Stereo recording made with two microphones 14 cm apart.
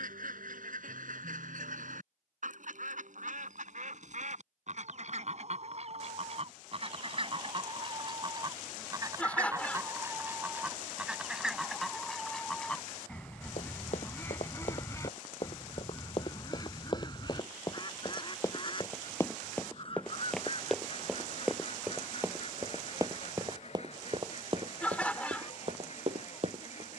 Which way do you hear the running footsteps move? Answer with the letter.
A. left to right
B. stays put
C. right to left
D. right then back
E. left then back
A.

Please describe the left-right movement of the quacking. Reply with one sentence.
In this clip you hear the quacking move to the left.